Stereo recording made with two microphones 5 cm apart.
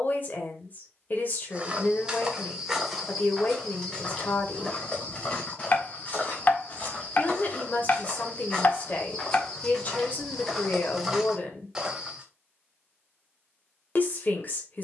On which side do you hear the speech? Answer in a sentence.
You can hear the speech on the left.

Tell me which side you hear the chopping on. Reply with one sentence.
In this clip you hear the chopping on the left.